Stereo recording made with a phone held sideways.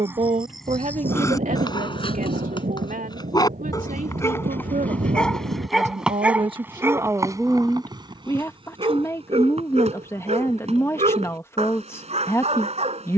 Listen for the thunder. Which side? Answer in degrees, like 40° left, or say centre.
60° right.